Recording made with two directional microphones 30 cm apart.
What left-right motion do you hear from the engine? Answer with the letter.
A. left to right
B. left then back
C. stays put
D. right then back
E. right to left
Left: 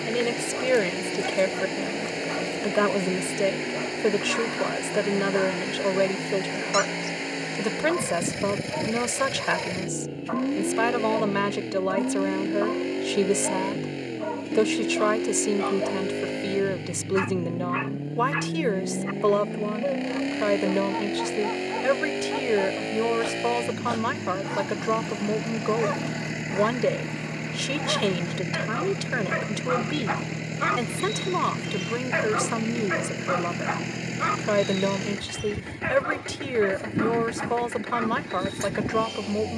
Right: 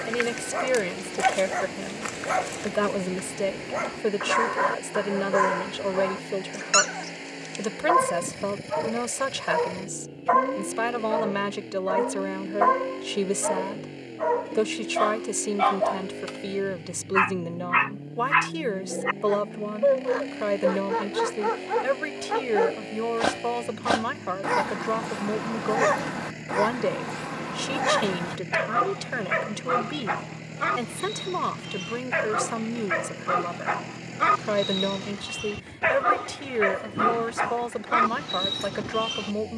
C.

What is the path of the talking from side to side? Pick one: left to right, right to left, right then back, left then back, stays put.
stays put.